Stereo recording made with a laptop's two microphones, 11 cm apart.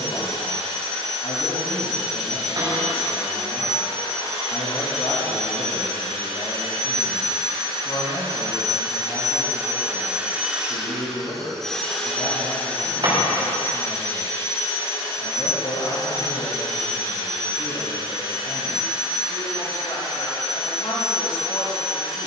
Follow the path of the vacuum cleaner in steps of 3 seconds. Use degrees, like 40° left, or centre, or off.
80° right, 80° right, 50° right, 10° right, 20° left, 40° left, 50° left, 50° left.